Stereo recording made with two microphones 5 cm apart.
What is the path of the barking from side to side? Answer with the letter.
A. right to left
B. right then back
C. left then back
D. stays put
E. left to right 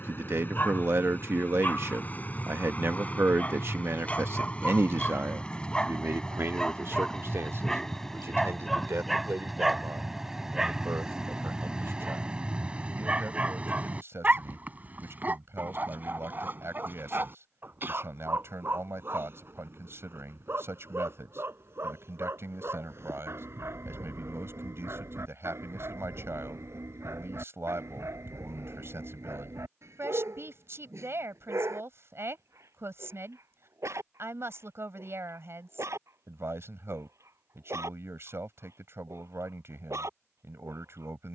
E.